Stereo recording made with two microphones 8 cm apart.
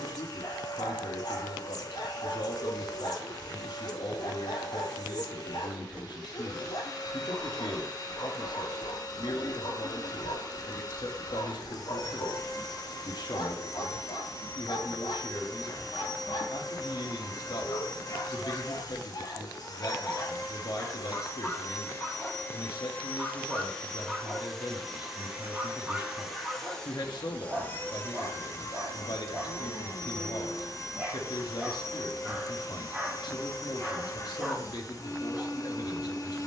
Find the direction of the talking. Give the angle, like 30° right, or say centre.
70° left.